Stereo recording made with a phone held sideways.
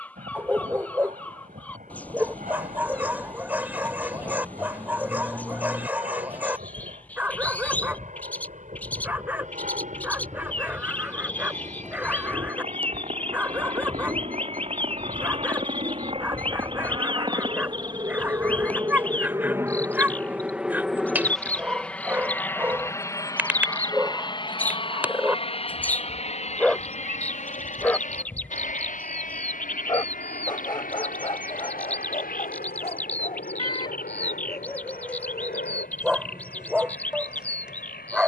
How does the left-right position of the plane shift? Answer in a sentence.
In this clip you hear the plane go from the right side to the left.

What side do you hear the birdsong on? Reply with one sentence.
You can hear the birdsong in the centre.